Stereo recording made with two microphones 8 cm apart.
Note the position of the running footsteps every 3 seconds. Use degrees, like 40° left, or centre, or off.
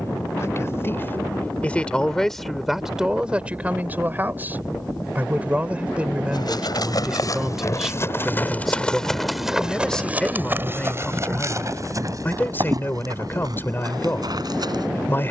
off, off, 40° left, 20° right, 50° right.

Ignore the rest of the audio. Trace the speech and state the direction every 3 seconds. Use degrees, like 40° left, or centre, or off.
20° left, 20° right, 10° right, 10° left, 30° left.